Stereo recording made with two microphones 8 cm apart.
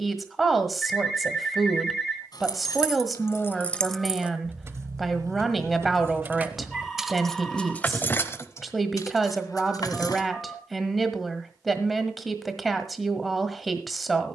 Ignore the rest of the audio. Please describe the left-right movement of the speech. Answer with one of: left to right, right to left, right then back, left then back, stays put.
stays put.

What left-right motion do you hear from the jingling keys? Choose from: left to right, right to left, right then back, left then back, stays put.
right then back.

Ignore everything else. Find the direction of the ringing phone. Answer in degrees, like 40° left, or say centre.
10° left.